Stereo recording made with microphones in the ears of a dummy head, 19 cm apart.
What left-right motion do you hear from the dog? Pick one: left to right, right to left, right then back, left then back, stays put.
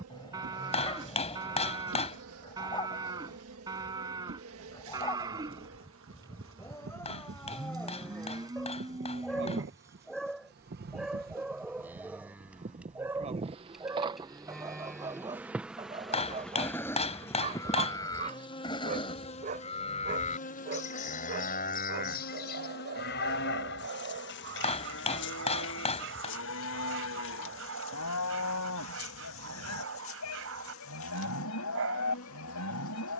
left to right.